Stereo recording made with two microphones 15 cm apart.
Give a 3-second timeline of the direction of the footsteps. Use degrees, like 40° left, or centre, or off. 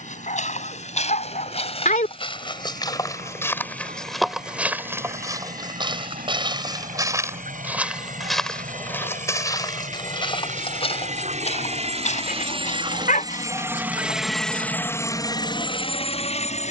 50° left, 10° right, 10° right, 40° left, 60° left, off.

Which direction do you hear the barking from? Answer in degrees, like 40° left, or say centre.
60° left.